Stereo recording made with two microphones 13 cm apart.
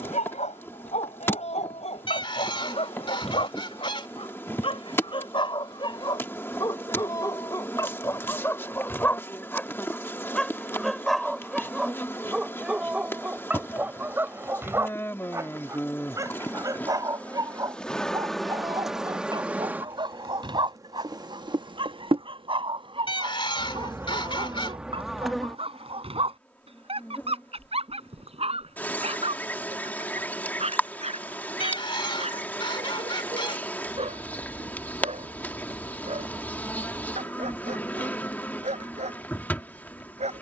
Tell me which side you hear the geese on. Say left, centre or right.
left.